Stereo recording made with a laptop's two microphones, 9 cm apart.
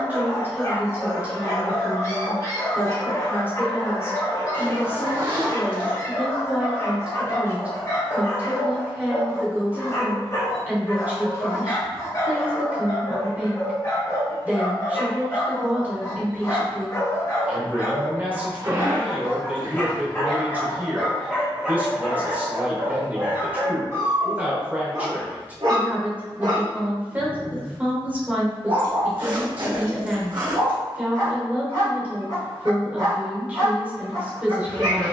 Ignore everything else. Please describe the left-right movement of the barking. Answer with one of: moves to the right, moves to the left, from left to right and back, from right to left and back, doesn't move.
moves to the right.